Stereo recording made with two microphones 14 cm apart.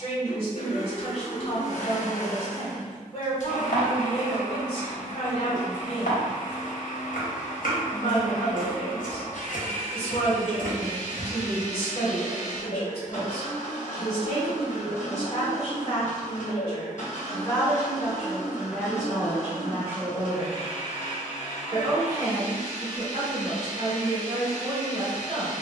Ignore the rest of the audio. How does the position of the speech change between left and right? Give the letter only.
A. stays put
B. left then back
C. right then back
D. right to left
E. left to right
E.